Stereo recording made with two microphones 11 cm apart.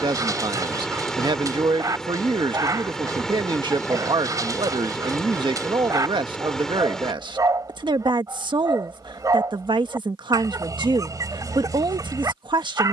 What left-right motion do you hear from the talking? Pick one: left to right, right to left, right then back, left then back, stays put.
stays put.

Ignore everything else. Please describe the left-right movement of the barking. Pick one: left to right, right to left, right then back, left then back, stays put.
stays put.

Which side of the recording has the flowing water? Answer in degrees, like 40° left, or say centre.
centre.